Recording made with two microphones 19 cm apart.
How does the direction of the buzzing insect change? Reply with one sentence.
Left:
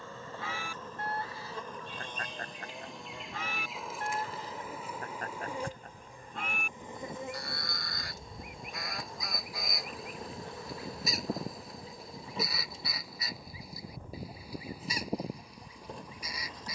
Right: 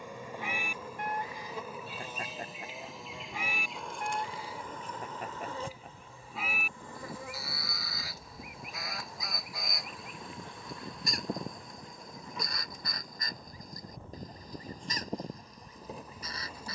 You can hear the buzzing insect go left and come back.